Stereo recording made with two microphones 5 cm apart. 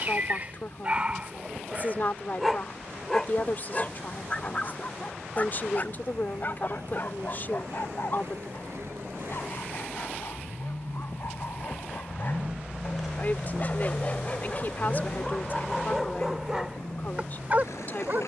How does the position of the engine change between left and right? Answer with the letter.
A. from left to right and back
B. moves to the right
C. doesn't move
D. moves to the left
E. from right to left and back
D.